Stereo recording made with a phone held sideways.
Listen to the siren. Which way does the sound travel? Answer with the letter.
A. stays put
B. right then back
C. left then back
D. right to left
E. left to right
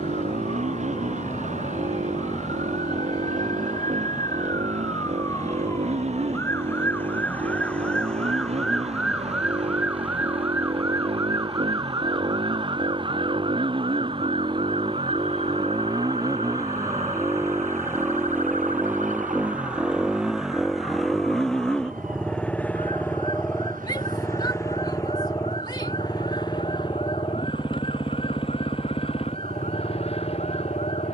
E.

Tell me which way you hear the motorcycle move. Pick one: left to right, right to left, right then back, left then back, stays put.
right to left.